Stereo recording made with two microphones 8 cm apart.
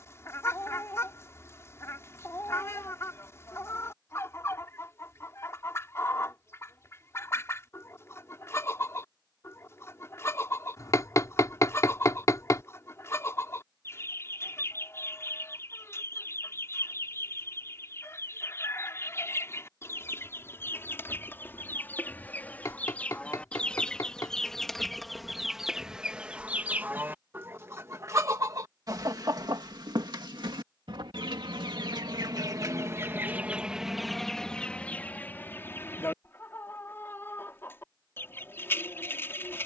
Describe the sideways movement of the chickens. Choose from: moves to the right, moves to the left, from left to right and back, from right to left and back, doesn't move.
from left to right and back.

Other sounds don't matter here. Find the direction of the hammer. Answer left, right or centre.
left.